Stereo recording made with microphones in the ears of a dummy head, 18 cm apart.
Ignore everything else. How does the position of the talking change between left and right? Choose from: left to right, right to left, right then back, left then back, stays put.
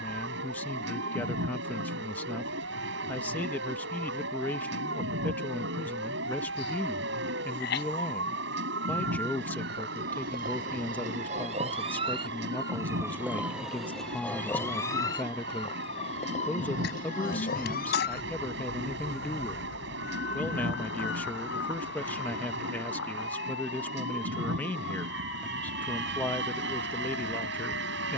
stays put.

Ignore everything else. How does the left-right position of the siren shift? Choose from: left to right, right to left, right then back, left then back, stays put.
right to left.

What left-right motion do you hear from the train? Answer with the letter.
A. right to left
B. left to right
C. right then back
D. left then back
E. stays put
E.